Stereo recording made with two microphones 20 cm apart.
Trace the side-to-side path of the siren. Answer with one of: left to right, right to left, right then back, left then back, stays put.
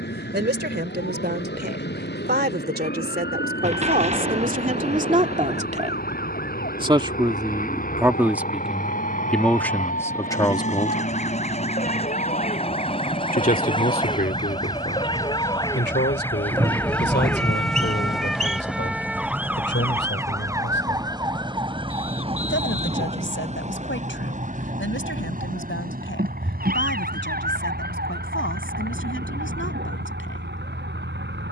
left to right.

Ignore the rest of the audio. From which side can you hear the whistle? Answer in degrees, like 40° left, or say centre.
40° right.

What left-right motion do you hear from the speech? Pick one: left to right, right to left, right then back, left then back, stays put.
right to left.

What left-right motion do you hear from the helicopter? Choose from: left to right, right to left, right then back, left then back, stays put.
left to right.